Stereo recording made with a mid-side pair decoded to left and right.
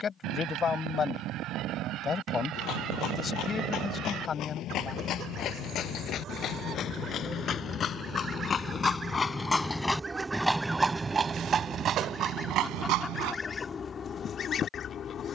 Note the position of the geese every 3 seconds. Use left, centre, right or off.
right, right, right, centre, left.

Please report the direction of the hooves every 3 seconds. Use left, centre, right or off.
left, left, left, centre, right.